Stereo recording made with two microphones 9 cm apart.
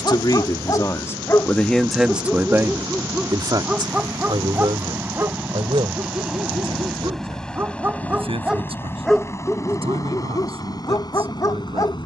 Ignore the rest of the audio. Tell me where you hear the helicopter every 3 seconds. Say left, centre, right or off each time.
right, right, centre, left.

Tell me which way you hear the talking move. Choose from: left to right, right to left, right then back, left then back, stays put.
left to right.